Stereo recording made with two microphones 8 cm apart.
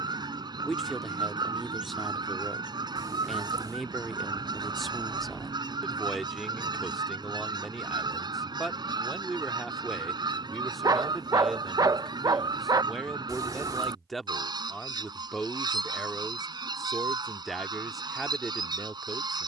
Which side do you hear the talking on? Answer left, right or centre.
centre.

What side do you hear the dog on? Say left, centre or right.
right.